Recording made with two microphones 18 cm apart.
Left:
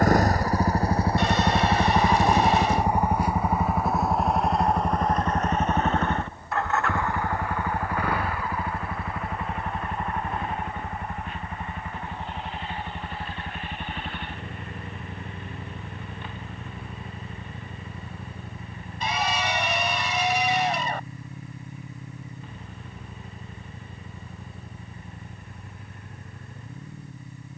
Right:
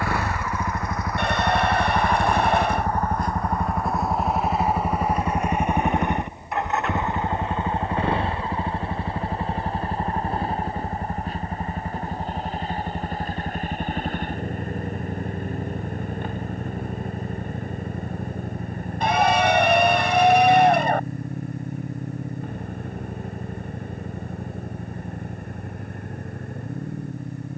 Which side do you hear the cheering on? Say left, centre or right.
right.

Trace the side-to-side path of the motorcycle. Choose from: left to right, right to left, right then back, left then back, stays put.
left to right.